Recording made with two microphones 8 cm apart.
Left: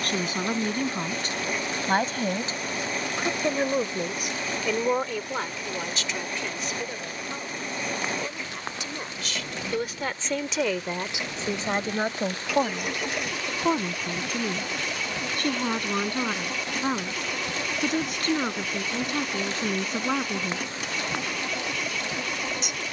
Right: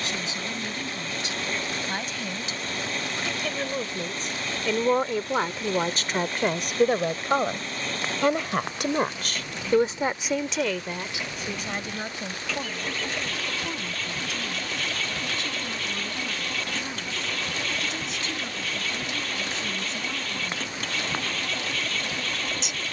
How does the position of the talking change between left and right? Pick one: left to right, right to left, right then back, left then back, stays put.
right then back.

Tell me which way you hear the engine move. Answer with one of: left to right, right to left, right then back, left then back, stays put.
stays put.